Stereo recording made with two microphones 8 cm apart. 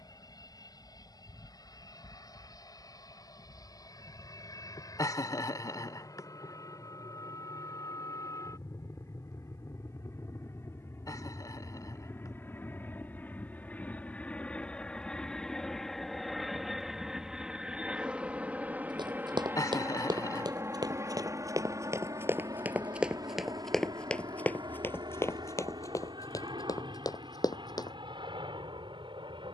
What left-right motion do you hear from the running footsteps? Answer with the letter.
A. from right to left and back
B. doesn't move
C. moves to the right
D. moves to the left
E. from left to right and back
D.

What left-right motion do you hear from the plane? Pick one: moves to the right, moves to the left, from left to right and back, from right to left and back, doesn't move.
moves to the right.